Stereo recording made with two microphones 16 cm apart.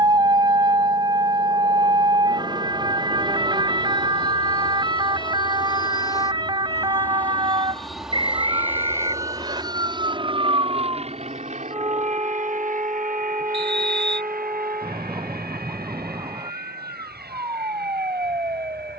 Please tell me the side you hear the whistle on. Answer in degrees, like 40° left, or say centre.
30° right.